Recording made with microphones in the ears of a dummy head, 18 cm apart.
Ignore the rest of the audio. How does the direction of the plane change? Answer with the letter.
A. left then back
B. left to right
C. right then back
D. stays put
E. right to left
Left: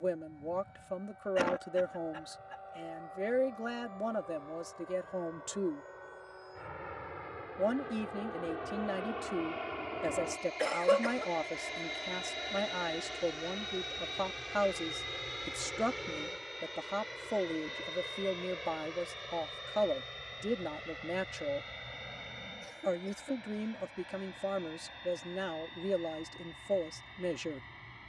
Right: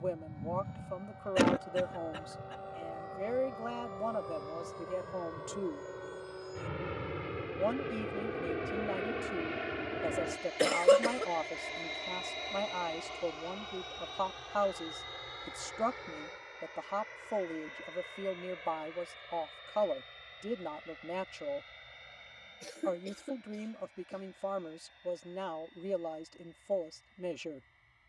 E.